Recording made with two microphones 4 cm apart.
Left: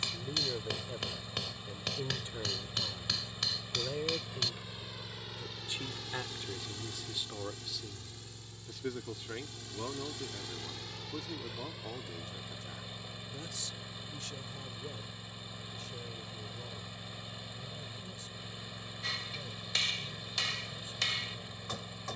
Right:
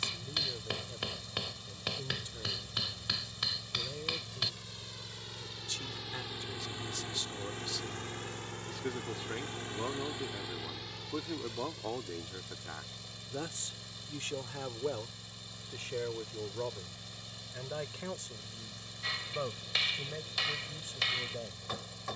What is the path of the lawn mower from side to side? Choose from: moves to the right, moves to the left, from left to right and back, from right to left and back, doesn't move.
from left to right and back.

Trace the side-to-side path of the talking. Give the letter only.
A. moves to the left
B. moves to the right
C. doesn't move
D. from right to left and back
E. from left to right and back
B.